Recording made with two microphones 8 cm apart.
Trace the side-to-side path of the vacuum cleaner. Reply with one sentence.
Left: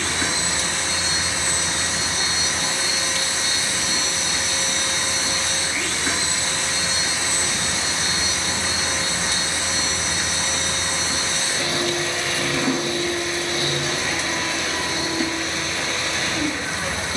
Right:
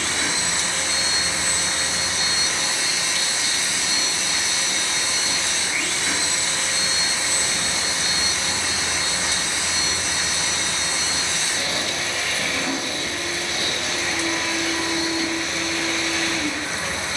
You can hear the vacuum cleaner stay put.